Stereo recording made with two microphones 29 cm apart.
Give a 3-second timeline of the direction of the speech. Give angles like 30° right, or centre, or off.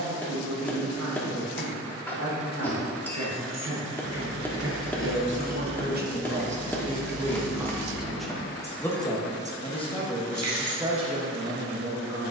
70° right, 50° right, 10° right, 10° right.